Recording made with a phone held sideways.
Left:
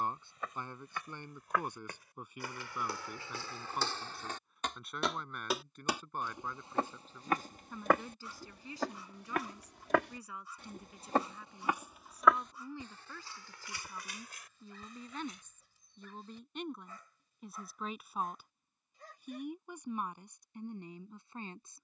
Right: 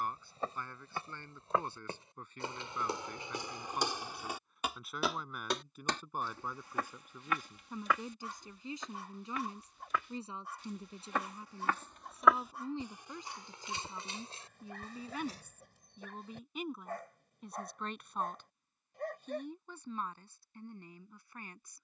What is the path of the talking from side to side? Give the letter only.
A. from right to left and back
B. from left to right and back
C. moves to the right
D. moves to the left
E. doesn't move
B.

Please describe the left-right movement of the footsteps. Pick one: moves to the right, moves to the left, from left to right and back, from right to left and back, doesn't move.
from right to left and back.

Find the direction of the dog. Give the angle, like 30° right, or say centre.
60° right.